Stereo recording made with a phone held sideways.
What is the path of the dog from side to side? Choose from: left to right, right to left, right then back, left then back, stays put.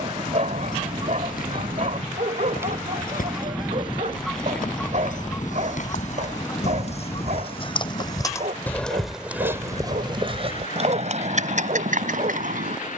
stays put.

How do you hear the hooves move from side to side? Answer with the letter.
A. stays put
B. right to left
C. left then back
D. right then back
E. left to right
E.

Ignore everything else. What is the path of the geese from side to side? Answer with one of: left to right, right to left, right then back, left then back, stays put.
right to left.